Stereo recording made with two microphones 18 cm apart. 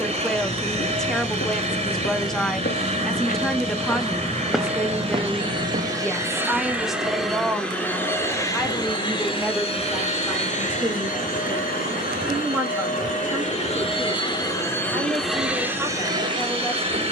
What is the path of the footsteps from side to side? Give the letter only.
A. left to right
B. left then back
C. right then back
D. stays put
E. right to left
A.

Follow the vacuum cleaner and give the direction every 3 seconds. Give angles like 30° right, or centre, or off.
30° right, 30° right, centre, 40° left, 30° left, 20° right.